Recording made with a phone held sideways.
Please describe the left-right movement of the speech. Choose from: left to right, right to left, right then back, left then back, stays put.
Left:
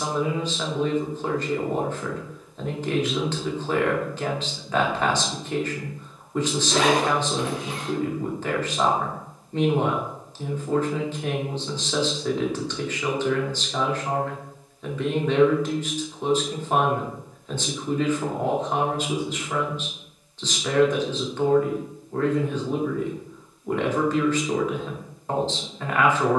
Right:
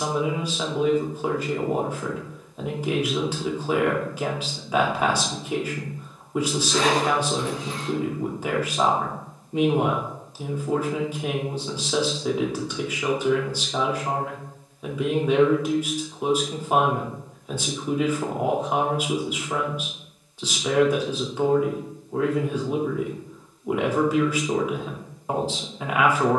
stays put.